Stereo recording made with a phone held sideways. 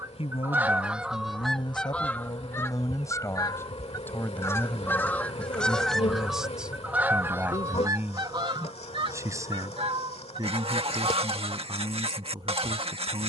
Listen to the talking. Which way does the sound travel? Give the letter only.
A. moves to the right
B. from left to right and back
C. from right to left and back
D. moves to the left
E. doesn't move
A.